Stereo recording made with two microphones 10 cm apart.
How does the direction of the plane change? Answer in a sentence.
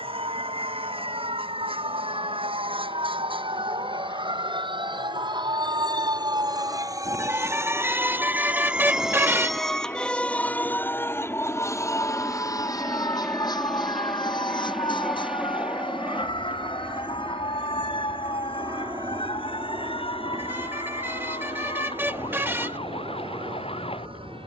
You can hear the plane go from the left side to the right.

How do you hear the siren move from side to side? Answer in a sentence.
In this clip you hear the siren travel towards the left.